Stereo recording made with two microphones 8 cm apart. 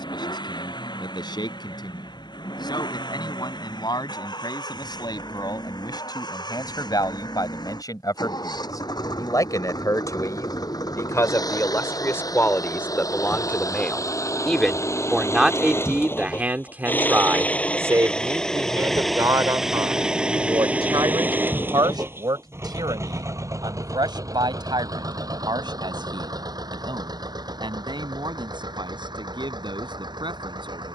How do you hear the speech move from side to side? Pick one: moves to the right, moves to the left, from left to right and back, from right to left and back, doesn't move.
moves to the right.